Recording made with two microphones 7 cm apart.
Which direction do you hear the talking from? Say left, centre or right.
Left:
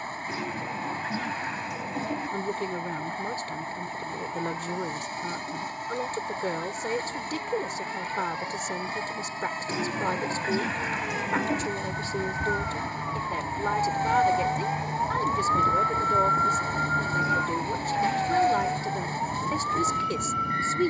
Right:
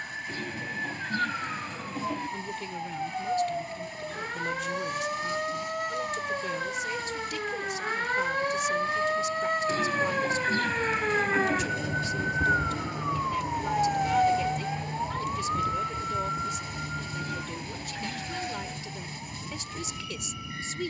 left.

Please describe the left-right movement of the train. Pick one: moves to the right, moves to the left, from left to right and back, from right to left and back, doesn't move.
doesn't move.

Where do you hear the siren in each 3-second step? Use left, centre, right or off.
right, right, right, right, centre, left, left.